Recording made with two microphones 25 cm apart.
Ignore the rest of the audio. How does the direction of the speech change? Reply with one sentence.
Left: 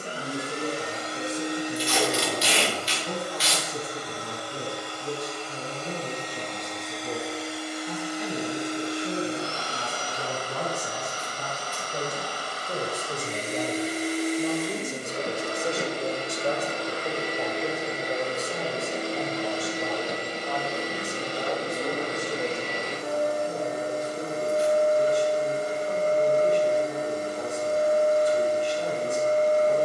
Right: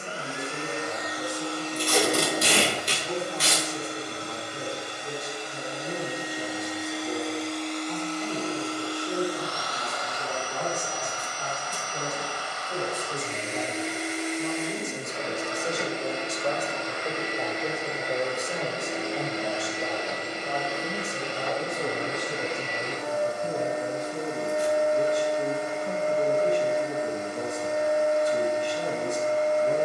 In this clip you hear the speech travel towards the right.